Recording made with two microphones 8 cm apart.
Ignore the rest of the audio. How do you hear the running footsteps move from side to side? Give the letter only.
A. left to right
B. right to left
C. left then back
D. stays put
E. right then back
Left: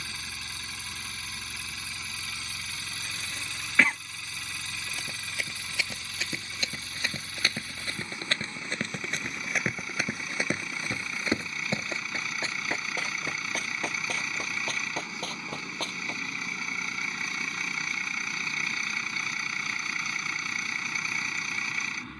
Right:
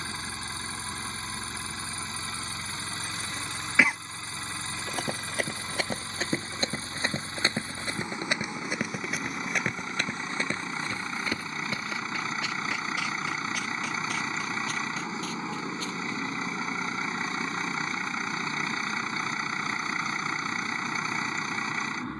B.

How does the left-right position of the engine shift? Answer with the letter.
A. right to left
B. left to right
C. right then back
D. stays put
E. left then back
D.